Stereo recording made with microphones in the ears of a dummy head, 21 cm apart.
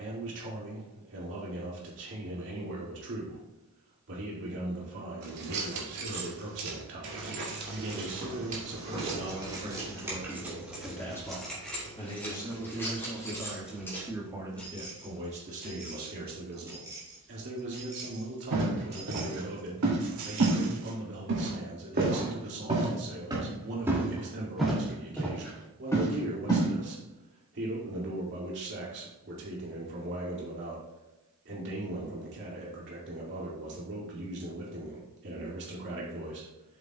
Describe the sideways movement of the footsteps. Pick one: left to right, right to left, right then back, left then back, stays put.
right to left.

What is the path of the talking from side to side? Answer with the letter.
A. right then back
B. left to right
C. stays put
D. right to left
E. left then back
E.